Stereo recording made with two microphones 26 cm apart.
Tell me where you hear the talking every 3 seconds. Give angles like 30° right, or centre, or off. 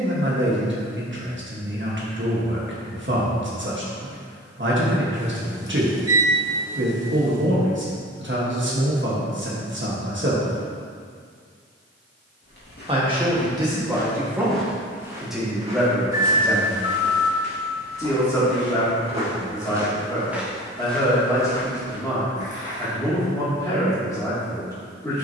50° right, 50° right, 50° right, 50° right, 10° right, centre, 10° left, 10° left, 10° left.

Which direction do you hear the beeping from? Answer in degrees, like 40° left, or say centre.
10° right.